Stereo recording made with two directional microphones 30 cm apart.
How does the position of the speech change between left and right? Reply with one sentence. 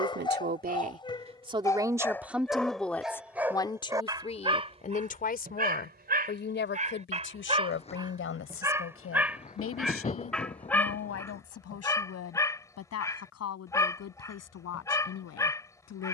In this clip you hear the speech move to the left.